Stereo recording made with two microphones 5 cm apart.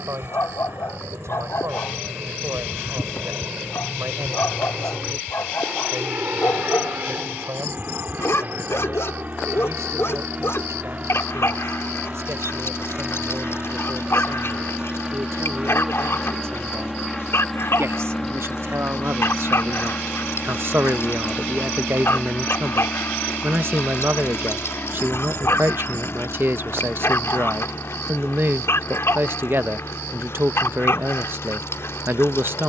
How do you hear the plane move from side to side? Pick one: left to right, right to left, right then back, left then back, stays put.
right to left.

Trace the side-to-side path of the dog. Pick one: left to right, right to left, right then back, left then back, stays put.
stays put.